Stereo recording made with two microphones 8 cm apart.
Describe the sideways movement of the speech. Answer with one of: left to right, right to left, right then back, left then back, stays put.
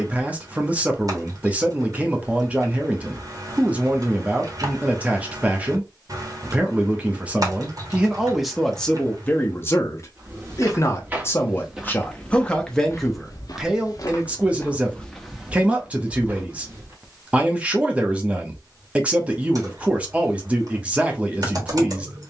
left then back.